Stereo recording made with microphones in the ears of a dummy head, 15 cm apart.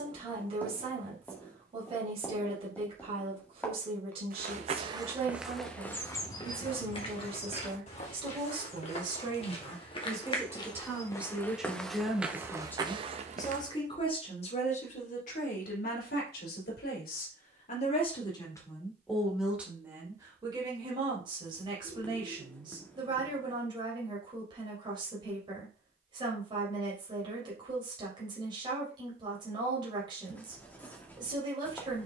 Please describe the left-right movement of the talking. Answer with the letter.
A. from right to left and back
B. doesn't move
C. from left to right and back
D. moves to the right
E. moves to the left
A.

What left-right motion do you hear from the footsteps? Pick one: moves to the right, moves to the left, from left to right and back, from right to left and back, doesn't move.
from right to left and back.